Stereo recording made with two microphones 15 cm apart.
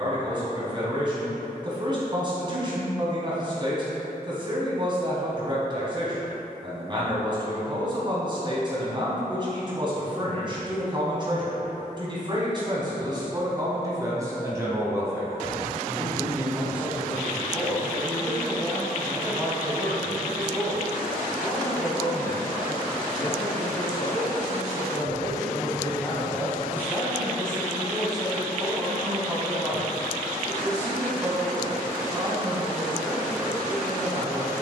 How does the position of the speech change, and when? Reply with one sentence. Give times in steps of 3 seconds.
You can hear the speech on the right from 0 s, in the centre from 15 s, on the left from 21 s, in the centre from 27 s and on the right from 30 s.